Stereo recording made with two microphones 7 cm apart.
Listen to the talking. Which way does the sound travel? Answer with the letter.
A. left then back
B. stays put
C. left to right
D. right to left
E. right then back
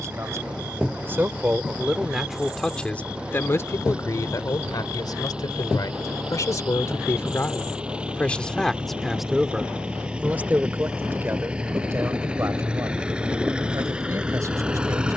A.